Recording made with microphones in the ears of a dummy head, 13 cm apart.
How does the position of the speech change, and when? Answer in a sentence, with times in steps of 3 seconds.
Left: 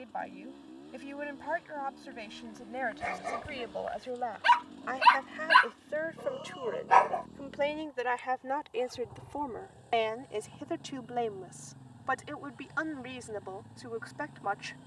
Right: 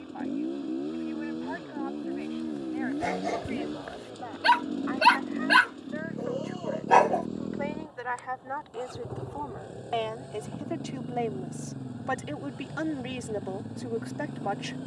In this clip you hear the speech on the left from 0 s, in the centre from 9 s and on the right from 12 s.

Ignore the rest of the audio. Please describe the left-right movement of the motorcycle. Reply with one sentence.
In this clip you hear the motorcycle stay put.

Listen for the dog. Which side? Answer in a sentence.
In this clip you hear the dog on the right.